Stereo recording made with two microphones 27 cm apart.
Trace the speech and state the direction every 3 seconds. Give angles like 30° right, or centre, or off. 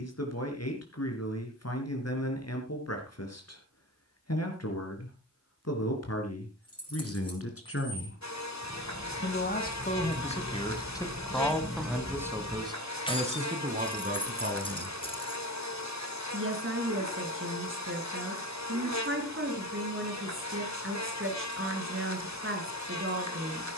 60° left, 60° left, 60° left, 20° left, 30° right, 50° right, 50° right, 50° right.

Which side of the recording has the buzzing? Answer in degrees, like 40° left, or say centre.
80° left.